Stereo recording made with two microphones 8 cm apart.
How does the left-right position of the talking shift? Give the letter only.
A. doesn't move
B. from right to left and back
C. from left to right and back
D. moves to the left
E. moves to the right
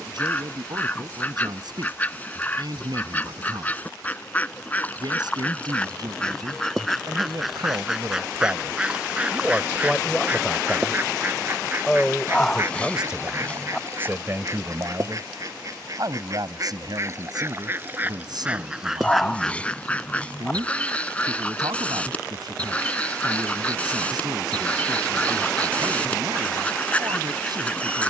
B.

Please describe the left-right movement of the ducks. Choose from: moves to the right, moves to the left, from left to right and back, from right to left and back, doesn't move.
from left to right and back.